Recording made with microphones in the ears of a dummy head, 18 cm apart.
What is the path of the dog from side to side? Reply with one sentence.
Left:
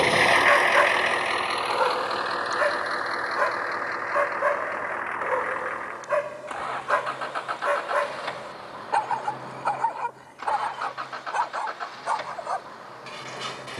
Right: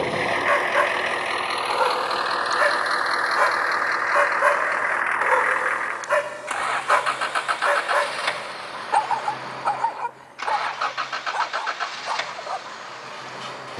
In this clip you hear the dog go right and come back.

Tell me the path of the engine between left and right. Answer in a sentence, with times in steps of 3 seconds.
In this clip you hear the engine in the centre from 0 s and on the right from 3 s.